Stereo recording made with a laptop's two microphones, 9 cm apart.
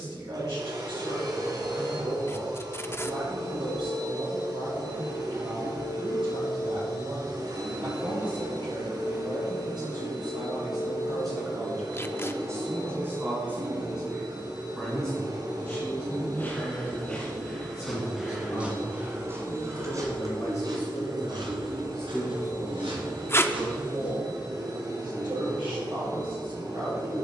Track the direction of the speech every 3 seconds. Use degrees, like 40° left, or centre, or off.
70° right, 70° right, 70° right, 50° right, 20° right, 20° left, 40° left, 10° right, 60° right.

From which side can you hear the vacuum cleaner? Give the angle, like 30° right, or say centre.
50° right.